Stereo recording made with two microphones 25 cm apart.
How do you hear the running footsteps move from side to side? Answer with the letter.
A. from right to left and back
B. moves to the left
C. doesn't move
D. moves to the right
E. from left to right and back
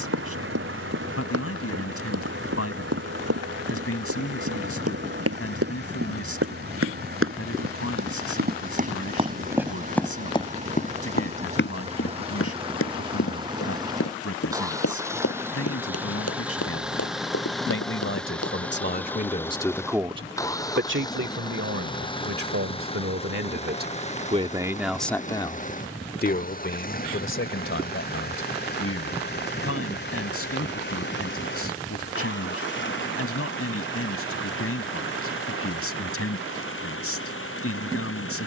B.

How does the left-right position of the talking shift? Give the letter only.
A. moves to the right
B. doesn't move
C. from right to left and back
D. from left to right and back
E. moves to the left
D.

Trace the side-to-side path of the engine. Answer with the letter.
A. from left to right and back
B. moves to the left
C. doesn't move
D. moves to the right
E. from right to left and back
B.